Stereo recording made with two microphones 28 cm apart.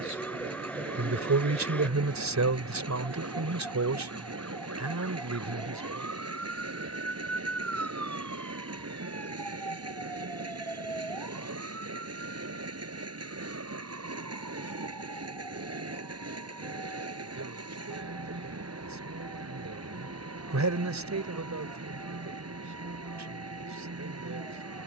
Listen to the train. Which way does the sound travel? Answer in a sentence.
In this clip you hear the train stay in one place.